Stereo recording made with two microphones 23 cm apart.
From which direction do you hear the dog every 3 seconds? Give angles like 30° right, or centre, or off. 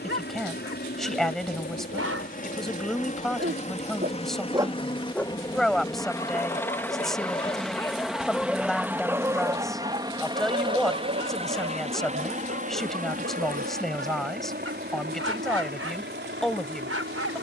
80° right, 20° right, 20° left, 40° right, 70° right, 80° right.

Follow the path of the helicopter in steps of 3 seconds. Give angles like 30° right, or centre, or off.
40° left, 20° left, centre, 20° right, 40° right, 50° right.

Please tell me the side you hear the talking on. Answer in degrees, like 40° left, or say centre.
centre.